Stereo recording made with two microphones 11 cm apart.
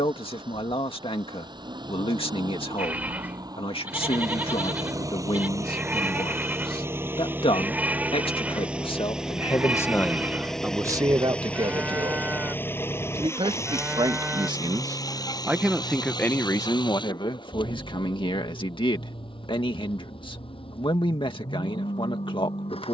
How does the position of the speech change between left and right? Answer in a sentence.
You can hear the speech move from left to right and back again.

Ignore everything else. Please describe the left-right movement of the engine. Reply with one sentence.
In this clip you hear the engine travel towards the left.